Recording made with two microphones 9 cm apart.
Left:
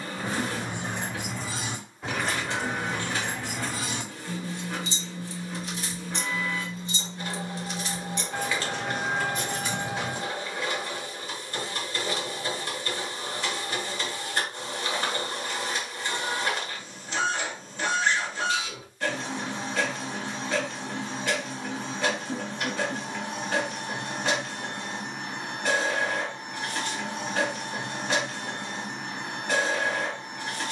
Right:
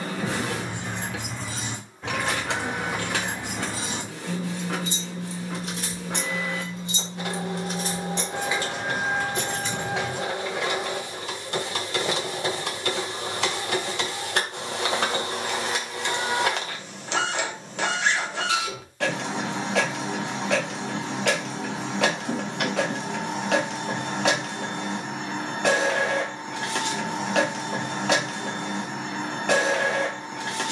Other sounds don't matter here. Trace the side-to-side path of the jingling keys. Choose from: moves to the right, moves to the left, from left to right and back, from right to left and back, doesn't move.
from left to right and back.